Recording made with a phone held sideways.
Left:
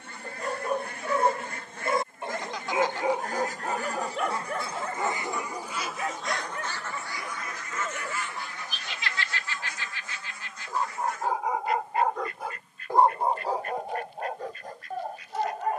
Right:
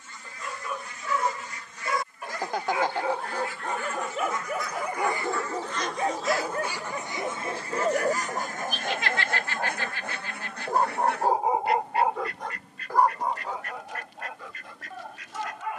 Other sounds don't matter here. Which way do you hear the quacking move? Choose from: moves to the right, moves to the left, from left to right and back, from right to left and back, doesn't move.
moves to the right.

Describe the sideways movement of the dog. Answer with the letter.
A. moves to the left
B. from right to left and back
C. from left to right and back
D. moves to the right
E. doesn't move
C.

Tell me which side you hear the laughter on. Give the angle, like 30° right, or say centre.
50° right.